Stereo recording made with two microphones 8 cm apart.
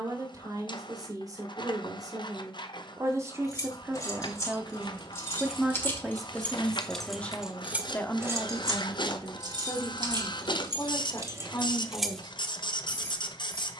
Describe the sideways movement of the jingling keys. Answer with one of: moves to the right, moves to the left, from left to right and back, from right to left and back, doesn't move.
from left to right and back.